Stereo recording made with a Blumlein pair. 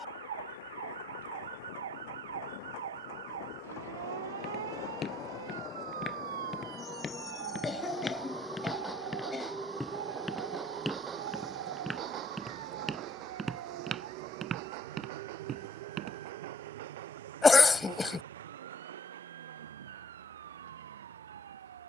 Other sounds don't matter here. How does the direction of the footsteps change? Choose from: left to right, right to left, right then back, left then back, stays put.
left to right.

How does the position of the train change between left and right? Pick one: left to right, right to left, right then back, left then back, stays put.
left to right.